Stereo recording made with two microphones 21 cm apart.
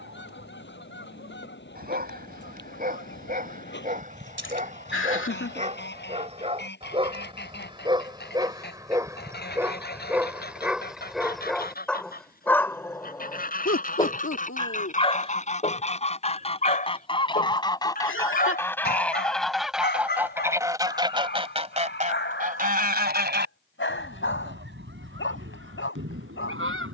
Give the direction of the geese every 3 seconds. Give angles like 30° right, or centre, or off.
60° left, 60° left, 50° left, 50° left, 40° left, 30° left, centre, 40° right, 70° right.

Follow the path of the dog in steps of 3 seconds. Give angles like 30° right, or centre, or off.
50° right, 40° right, 20° right, 10° right, 20° left, 40° left, 50° left, 60° left, 70° left.